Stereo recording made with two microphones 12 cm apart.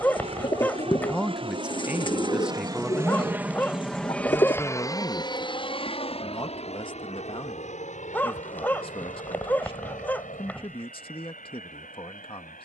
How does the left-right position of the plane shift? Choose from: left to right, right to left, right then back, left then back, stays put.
right to left.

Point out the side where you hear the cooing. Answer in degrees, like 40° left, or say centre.
40° left.